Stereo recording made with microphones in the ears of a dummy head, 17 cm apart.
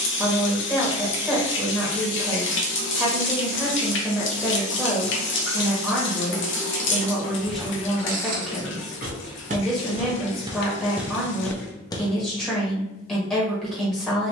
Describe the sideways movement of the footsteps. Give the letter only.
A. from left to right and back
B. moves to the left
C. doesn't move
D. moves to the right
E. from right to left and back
A.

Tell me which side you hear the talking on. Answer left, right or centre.
centre.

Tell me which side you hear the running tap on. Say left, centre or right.
left.